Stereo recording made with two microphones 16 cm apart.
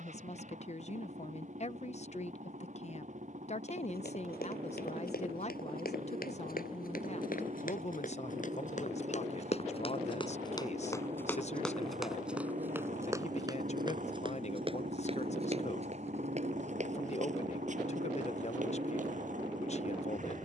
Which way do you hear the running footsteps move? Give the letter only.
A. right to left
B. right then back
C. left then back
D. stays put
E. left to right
E.